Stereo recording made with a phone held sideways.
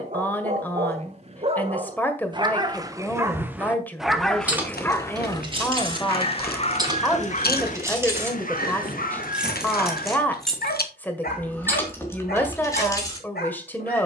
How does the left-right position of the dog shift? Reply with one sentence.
You can hear the dog go from the right side to the left.